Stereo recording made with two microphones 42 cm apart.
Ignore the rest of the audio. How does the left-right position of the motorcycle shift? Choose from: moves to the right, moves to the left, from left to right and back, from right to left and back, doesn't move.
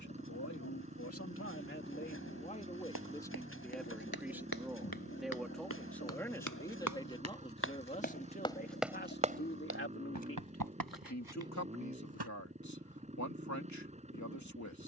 doesn't move.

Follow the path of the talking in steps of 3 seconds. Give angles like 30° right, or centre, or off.
30° left, centre, 10° left, 30° left, 40° left.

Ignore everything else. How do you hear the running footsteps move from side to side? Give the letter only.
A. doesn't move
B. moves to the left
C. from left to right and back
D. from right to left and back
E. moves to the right
E.